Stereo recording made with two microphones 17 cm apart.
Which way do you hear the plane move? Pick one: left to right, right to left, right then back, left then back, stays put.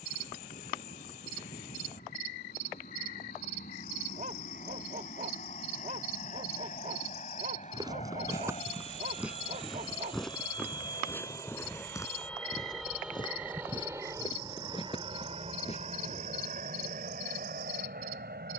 left to right.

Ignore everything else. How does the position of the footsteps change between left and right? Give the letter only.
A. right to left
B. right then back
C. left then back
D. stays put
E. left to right
A.